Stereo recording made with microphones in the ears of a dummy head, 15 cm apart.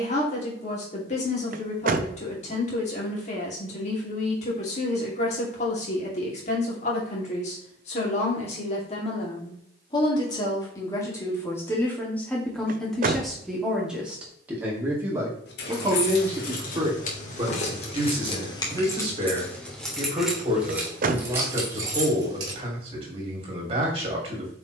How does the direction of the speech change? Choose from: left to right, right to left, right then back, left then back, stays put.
left to right.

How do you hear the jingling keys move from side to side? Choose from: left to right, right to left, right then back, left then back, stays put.
left to right.